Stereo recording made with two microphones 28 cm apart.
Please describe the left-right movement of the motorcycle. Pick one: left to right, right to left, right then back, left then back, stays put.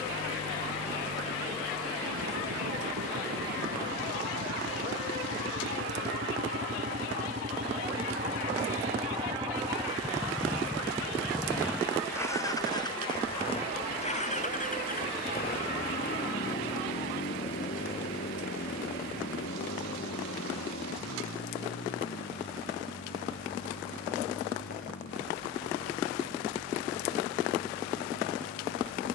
right to left.